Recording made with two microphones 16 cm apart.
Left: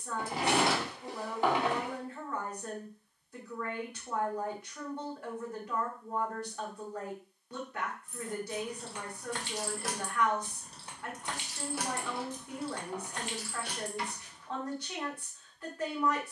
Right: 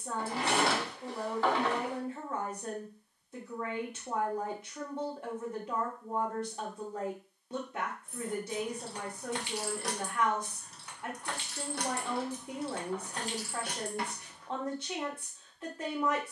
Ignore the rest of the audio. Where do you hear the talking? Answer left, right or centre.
right.